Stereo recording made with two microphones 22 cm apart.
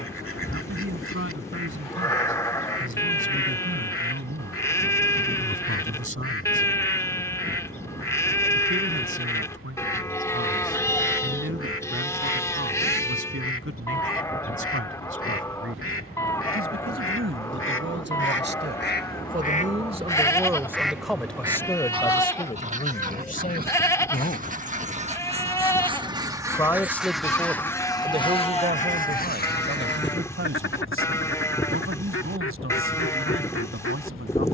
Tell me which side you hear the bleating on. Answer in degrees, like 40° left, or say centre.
10° left.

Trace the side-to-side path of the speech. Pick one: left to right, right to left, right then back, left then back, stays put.
left then back.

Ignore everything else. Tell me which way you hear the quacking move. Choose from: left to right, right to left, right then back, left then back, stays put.
right then back.